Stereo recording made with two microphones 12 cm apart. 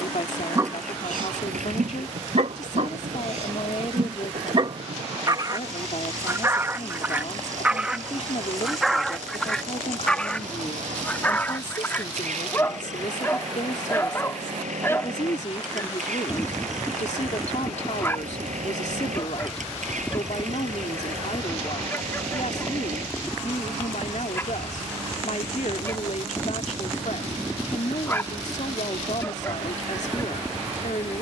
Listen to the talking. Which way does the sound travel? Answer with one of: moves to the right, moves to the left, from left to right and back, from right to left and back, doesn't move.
doesn't move.